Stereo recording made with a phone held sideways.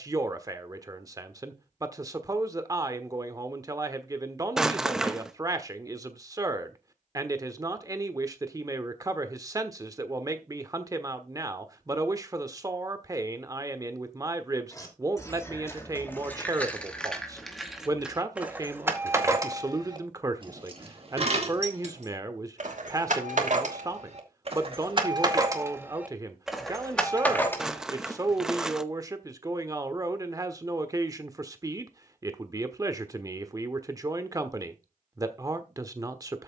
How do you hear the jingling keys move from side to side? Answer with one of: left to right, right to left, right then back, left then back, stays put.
right then back.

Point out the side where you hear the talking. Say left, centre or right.
right.